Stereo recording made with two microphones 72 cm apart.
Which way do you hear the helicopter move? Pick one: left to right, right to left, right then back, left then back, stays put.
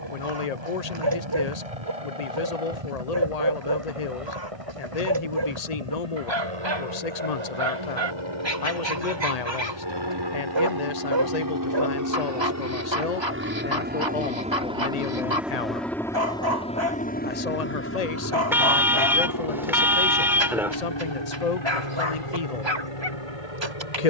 right to left.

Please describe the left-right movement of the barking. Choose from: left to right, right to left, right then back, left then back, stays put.
stays put.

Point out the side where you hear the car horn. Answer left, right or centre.
centre.